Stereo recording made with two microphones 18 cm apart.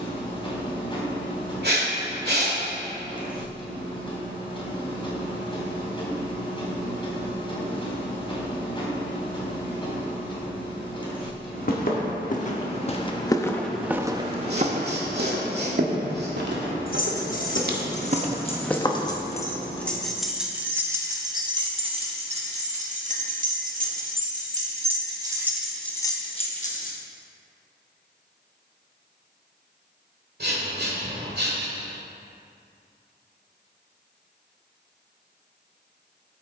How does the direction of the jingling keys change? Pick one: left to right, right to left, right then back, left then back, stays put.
right then back.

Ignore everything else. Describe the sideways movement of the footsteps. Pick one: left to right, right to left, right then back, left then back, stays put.
right then back.